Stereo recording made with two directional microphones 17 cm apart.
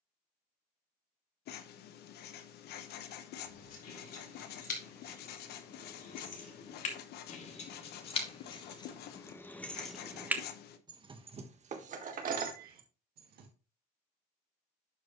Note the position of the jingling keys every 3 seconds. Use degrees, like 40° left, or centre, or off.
off, 60° left, 40° left, 10° right, 60° right.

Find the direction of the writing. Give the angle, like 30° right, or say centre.
70° left.